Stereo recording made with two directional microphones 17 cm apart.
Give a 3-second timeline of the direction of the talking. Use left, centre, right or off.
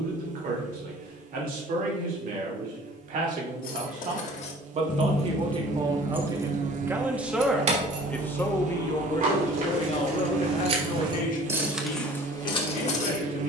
right, right, centre, left, left.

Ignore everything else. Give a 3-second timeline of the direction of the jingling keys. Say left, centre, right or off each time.
off, left, right, right, left.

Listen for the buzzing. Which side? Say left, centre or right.
right.